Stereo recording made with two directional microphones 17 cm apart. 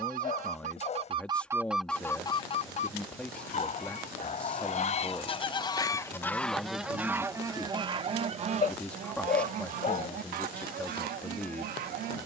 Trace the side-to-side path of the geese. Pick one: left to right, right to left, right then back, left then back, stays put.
left then back.